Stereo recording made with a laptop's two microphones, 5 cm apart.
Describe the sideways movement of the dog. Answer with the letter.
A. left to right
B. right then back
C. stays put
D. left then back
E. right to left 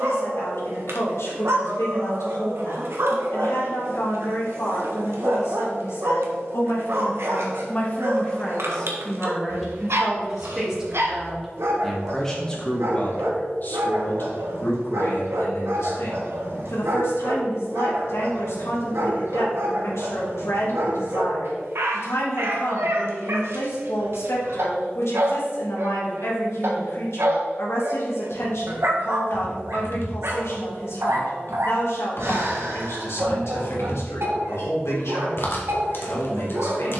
C.